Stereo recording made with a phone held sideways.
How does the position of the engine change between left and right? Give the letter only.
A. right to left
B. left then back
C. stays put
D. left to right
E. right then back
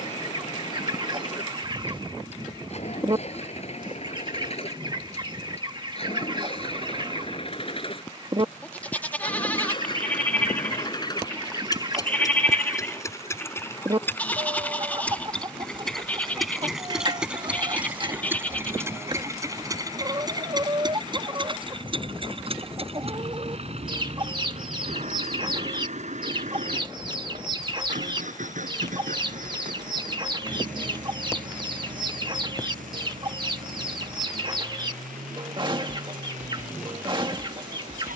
D.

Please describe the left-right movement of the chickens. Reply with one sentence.
You can hear the chickens stay in one place.